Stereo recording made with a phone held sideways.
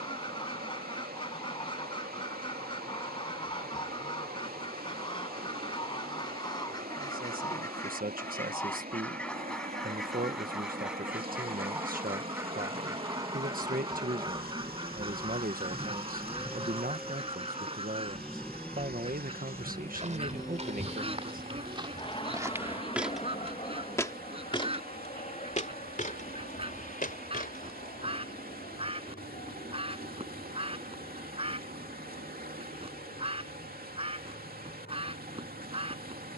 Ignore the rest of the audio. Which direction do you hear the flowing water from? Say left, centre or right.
right.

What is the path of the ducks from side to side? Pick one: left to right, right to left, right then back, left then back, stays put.
left to right.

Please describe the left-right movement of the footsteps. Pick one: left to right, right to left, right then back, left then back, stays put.
right to left.